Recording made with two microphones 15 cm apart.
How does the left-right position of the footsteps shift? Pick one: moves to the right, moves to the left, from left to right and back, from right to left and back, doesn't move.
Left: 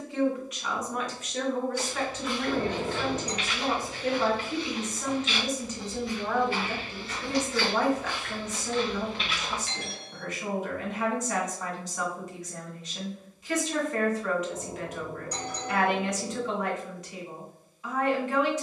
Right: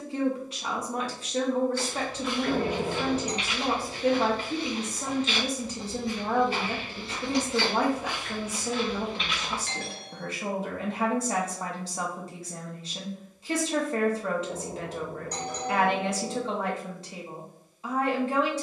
from left to right and back.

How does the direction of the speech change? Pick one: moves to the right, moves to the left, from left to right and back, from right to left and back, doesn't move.
doesn't move.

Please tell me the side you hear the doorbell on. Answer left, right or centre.
right.